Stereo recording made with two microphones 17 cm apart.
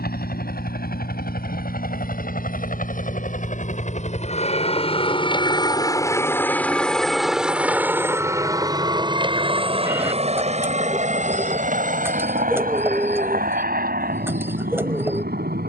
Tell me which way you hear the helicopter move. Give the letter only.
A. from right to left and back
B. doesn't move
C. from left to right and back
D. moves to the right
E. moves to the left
D.